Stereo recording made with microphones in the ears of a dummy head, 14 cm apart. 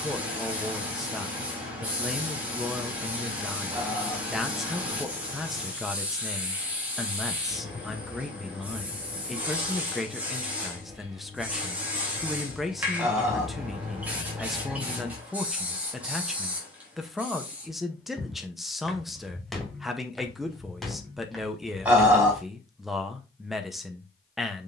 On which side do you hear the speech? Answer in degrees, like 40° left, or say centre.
centre.